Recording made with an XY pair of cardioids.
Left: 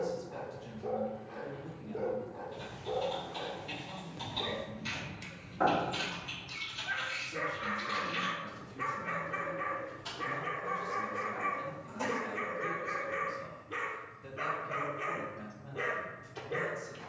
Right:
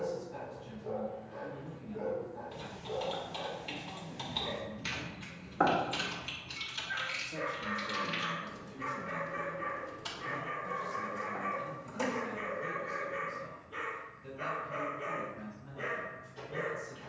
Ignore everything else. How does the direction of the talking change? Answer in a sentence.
You can hear the talking go right and come back.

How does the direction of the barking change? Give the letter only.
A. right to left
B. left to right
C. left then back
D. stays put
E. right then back
D.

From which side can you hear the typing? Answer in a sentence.
You can hear the typing on the right.